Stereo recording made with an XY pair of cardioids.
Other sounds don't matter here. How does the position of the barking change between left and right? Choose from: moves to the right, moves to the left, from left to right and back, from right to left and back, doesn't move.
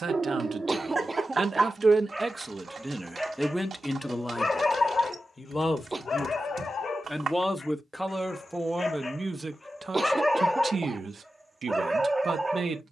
from right to left and back.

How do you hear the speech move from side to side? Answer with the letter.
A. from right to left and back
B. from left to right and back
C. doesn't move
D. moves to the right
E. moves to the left
A.